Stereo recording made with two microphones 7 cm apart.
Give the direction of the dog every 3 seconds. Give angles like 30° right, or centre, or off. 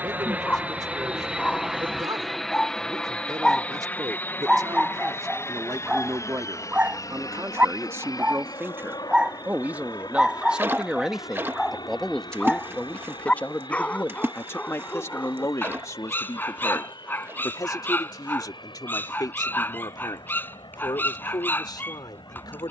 20° left, 10° right, 20° right, centre, 20° left, 30° left, 30° left, 30° left.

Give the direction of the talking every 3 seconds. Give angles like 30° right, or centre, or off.
60° right, 50° right, 40° right, 10° right, 20° left, 50° left, 60° left, 70° left.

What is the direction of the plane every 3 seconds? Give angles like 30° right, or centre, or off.
10° right, 30° left, 50° left, 60° left, 70° left, 70° left, 70° left, 70° left.